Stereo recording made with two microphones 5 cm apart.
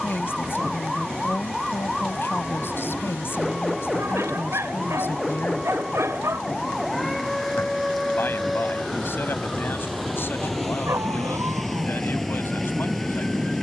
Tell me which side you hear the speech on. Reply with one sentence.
In this clip you hear the speech on the left.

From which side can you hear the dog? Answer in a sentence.
You can hear the dog on the right.